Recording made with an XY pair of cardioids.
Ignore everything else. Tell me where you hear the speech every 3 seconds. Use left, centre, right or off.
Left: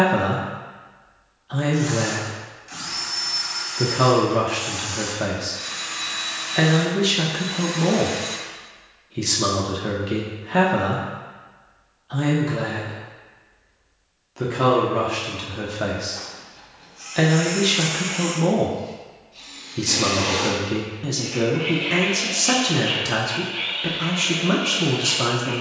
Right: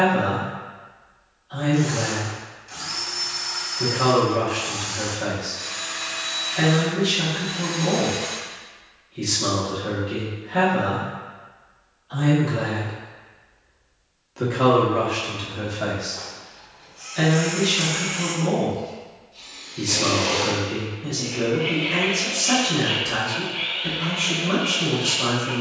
left, left, left, left, centre, left, left, left, left.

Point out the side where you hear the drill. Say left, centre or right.
left.